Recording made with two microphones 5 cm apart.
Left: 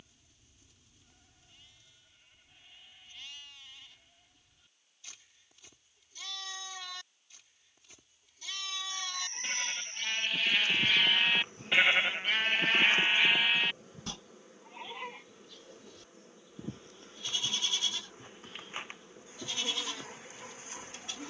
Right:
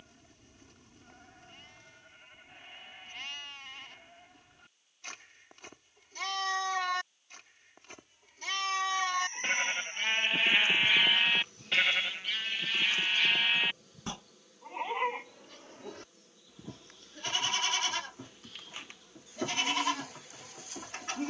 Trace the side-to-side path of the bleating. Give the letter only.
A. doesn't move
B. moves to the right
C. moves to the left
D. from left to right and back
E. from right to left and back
E.